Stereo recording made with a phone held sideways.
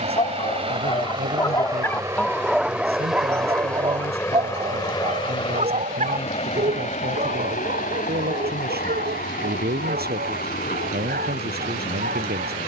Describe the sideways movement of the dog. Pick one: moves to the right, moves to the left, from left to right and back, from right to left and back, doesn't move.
moves to the right.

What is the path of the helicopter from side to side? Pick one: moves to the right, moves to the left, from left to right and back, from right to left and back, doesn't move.
moves to the left.